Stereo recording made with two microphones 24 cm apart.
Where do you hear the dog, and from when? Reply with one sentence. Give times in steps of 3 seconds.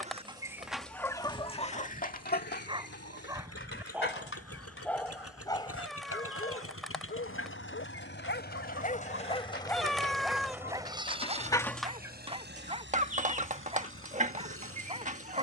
In this clip you hear the dog on the right from 0 s, in the centre from 3 s, on the left from 6 s, in the centre from 9 s and on the right from 12 s.